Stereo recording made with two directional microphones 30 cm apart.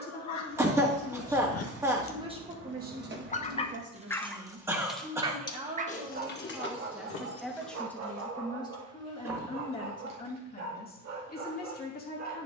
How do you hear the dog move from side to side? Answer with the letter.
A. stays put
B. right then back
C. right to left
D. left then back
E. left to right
E.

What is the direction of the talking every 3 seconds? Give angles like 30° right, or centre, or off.
centre, 30° right, centre, 30° left.